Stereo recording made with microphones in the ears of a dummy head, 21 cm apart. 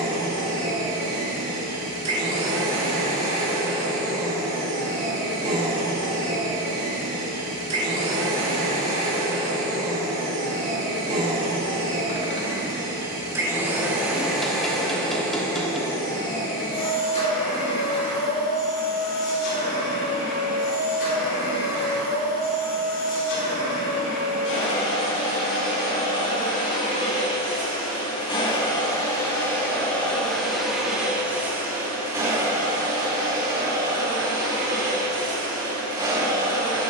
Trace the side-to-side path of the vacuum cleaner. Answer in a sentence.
In this clip you hear the vacuum cleaner move from right to left and back again.